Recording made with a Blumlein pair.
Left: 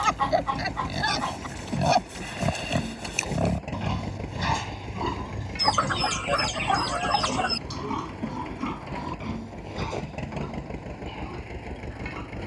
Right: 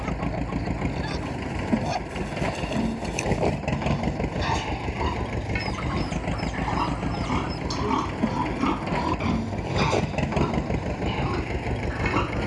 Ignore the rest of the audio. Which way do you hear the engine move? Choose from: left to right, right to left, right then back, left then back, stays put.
stays put.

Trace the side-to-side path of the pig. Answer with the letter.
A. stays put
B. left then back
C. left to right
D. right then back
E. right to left
C.